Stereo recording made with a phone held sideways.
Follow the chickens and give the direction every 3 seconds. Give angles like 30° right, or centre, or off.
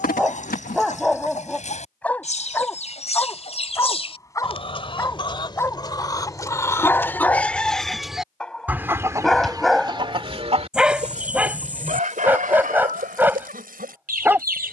50° left, 40° left, 10° left, 40° right, 70° right.